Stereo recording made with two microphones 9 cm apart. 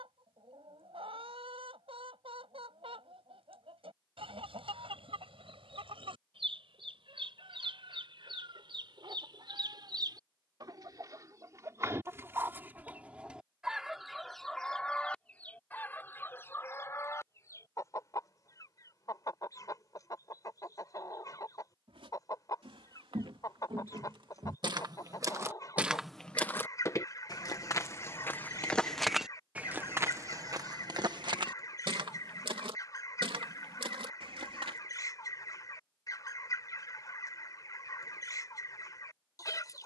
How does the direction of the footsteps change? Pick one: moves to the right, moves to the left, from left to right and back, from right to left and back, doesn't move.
from right to left and back.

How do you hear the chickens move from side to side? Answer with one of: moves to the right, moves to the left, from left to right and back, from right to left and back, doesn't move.
moves to the left.